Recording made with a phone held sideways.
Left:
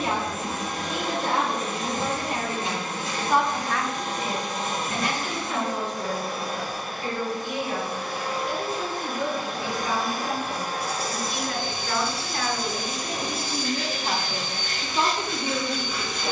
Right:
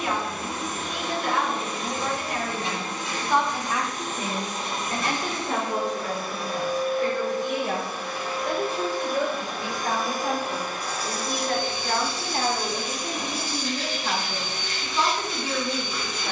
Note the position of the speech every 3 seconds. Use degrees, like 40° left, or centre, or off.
30° left, 30° right, 70° right, 60° right, 10° right, 20° left.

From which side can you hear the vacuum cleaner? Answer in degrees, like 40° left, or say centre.
50° left.